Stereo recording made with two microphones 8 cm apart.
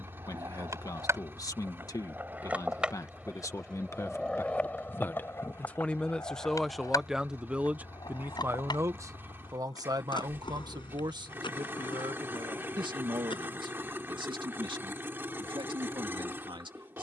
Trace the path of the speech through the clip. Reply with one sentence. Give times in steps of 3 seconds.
You can hear the speech on the left from 0 s, in the centre from 6 s and on the right from 9 s.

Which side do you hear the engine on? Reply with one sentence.
In this clip you hear the engine on the right.